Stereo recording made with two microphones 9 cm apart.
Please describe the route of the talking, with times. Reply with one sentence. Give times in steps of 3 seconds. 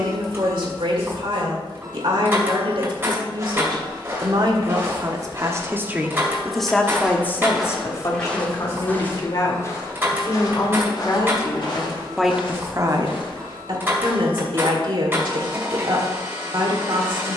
You can hear the talking on the right from 0 s, on the left from 6 s and on the right from 12 s.